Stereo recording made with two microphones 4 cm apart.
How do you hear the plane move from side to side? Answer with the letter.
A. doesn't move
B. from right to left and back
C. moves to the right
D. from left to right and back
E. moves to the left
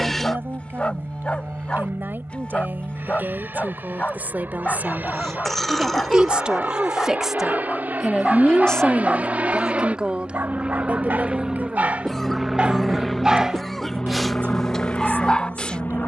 E.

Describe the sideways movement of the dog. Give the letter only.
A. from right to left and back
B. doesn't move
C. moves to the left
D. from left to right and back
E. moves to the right
D.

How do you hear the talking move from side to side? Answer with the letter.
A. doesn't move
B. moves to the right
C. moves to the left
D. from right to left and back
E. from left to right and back
D.